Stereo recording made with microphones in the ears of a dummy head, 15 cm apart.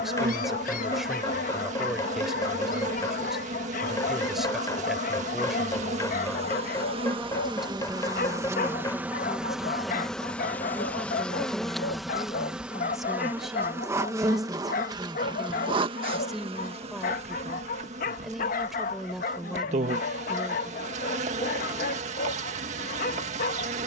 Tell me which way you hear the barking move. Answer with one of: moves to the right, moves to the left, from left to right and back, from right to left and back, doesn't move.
doesn't move.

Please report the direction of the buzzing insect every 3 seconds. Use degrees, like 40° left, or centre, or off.
40° right, 40° right, 30° right, centre, 10° right, 30° right, 40° right, 40° right.